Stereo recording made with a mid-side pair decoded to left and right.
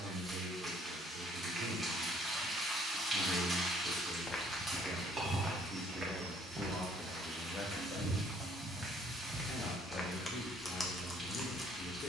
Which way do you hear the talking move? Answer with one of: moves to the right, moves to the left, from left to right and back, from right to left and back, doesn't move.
moves to the left.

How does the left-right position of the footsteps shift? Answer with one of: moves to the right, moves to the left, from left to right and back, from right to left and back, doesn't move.
from left to right and back.